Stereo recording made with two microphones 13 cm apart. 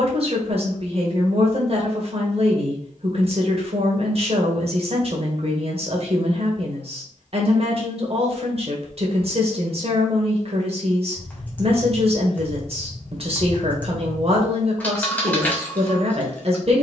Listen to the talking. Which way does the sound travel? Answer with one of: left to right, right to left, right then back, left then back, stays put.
stays put.